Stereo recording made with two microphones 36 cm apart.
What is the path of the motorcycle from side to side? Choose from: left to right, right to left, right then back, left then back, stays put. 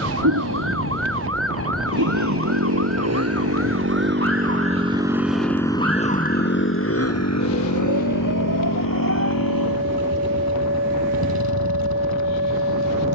right to left.